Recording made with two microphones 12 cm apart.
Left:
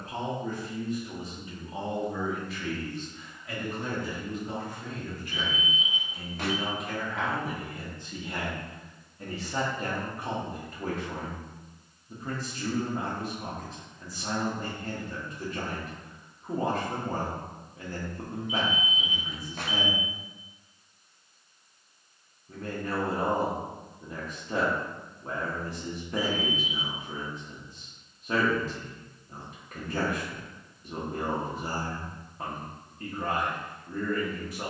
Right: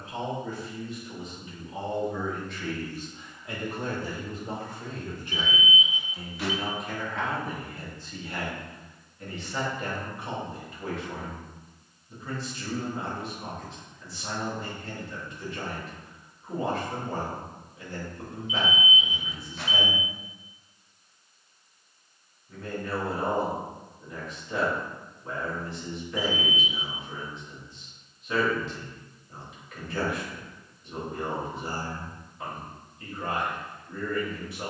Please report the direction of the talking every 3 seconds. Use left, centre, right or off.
left, right, centre, left, left, left, left, left, left, left, left, left.